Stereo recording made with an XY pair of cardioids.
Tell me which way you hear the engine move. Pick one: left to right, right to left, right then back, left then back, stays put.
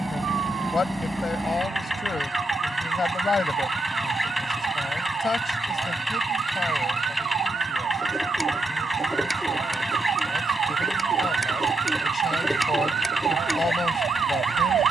stays put.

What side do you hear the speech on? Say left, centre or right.
left.